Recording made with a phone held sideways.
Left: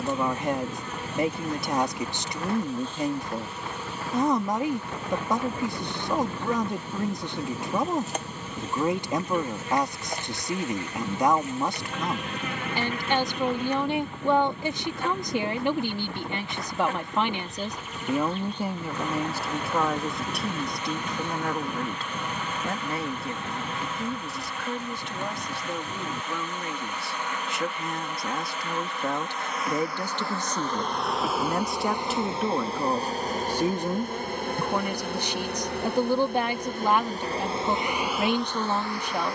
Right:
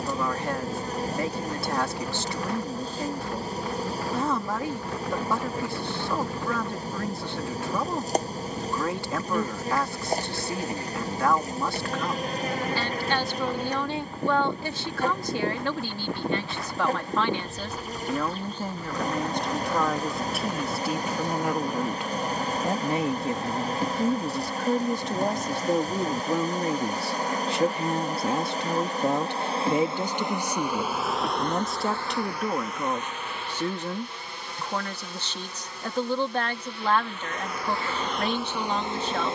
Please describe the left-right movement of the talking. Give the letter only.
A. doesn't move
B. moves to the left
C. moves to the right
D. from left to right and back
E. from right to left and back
D.